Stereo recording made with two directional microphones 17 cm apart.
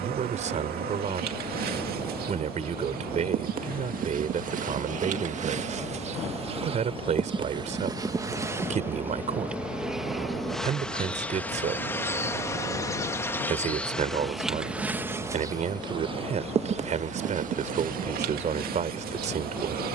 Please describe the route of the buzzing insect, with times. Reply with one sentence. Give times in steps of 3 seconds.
You can hear the buzzing insect on the right from 0 s, in the centre from 9 s and on the right from 15 s.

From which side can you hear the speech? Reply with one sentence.
You can hear the speech on the right.